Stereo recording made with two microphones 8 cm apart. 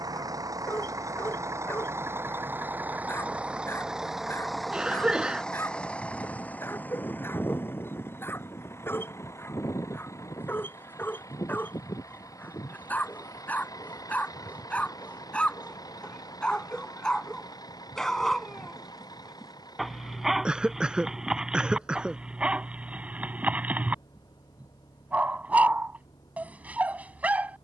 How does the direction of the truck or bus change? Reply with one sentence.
In this clip you hear the truck or bus move from right to left.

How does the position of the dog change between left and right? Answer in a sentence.
In this clip you hear the dog move to the right.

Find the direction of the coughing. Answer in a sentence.
In this clip you hear the coughing in the centre.